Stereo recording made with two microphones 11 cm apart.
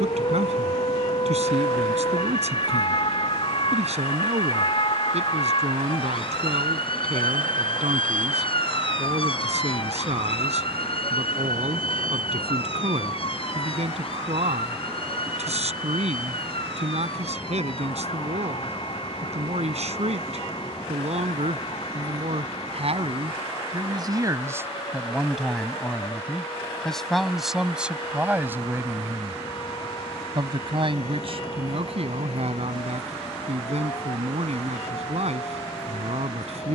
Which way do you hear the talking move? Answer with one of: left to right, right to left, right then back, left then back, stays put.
left then back.